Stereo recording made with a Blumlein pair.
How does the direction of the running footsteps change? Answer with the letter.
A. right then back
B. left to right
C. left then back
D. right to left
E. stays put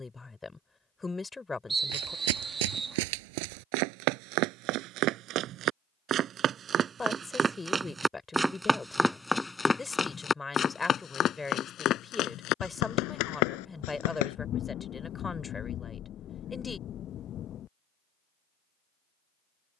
D.